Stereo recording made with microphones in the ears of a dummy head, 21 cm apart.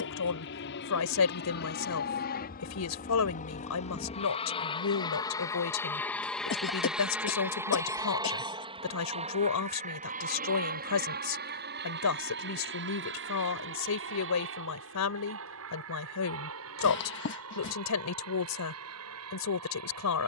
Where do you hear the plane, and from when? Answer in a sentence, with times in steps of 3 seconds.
You can hear the plane on the left from 0 s, in the centre from 6 s and on the right from 9 s.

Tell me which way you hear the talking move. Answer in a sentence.
You can hear the talking stay put.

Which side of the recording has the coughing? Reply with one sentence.
You can hear the coughing on the left.